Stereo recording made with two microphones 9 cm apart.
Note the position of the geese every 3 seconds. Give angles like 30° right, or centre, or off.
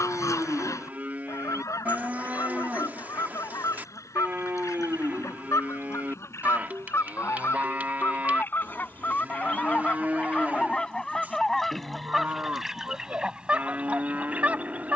40° left, 30° left, 30° left, 10° left, 10° right.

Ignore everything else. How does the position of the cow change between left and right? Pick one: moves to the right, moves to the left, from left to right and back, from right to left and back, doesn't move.
doesn't move.